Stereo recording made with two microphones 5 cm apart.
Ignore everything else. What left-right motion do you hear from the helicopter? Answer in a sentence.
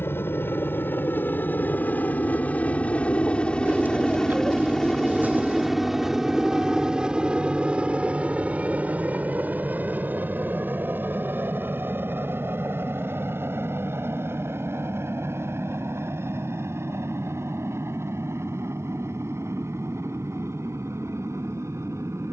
You can hear the helicopter move from left to right.